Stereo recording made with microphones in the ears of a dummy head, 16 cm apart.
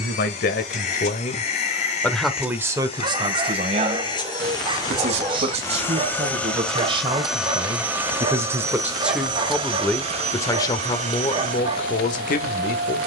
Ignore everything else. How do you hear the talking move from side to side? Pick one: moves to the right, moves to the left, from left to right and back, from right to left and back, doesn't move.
from left to right and back.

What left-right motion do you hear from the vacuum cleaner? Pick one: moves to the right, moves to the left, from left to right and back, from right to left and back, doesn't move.
moves to the right.